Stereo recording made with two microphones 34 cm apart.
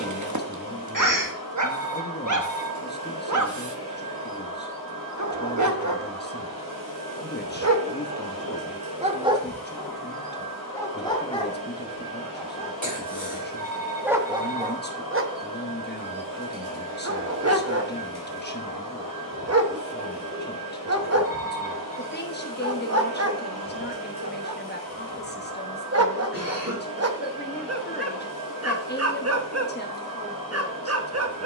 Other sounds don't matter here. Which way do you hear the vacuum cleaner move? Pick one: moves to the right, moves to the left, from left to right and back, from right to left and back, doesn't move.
doesn't move.